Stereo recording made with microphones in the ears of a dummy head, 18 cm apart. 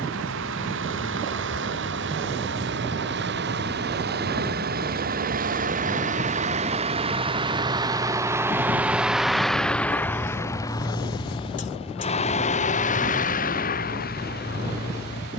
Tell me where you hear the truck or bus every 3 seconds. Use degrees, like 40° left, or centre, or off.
60° right, 50° right, 20° right, 10° left, 40° left.